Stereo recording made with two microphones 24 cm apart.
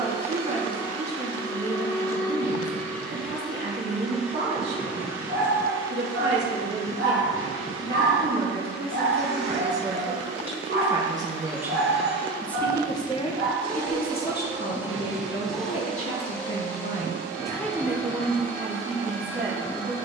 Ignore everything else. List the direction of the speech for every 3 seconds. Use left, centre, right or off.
right, right, right, right, left, left, right.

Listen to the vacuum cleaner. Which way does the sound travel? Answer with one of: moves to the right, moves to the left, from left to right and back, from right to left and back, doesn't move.
from left to right and back.